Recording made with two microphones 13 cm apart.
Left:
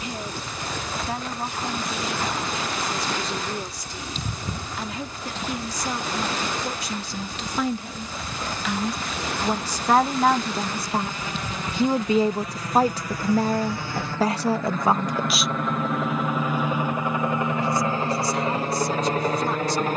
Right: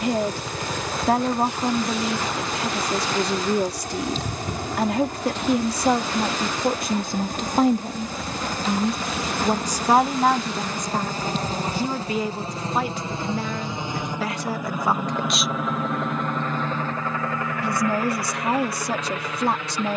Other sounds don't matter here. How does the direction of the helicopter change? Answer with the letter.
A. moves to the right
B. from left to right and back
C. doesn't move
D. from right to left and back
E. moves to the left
E.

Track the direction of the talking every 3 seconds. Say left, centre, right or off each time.
right, right, right, centre, left, right, right.